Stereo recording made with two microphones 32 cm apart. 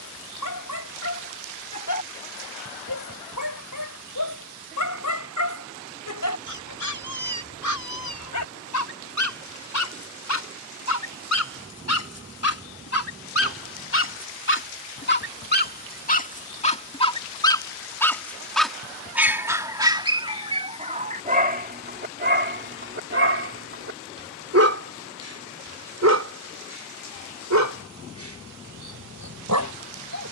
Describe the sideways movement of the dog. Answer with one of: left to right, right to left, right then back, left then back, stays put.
left to right.